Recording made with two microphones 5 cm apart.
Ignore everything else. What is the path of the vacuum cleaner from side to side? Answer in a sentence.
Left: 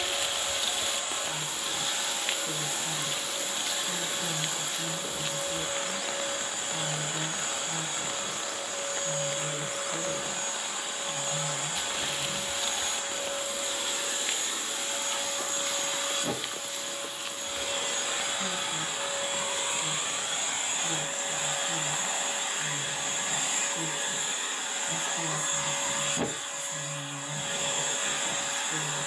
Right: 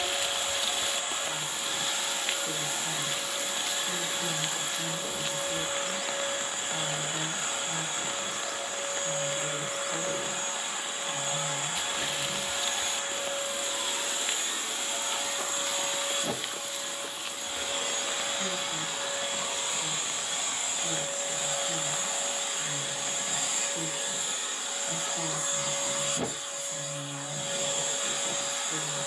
You can hear the vacuum cleaner move to the left.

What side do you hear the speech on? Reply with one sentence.
You can hear the speech on the right.